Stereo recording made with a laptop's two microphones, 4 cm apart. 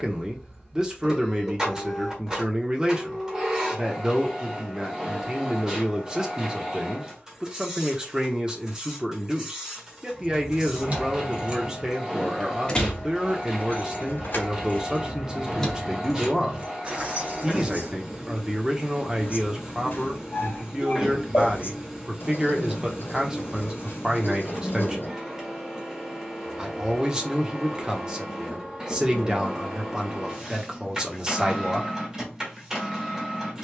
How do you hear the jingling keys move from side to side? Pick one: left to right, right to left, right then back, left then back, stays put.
left then back.